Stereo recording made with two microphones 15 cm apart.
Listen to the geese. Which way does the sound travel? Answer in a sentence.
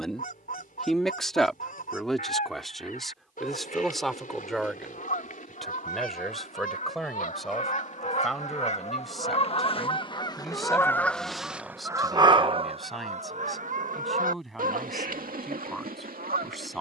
In this clip you hear the geese move from left to right.